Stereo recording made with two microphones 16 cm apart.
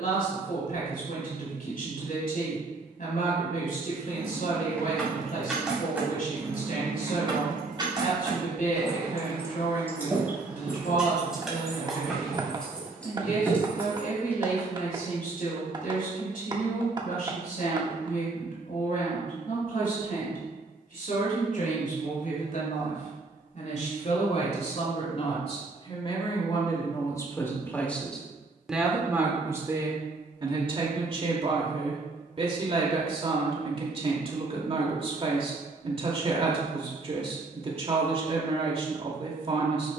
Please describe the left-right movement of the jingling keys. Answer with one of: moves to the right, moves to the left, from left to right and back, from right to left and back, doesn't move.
from left to right and back.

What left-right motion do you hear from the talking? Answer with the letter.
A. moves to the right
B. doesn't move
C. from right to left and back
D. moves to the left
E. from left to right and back
A.